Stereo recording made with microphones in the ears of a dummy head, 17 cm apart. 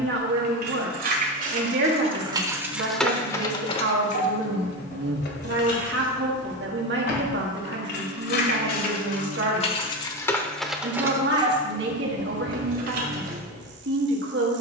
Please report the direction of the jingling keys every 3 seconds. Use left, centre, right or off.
right, left, left, centre, right.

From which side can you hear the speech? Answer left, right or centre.
right.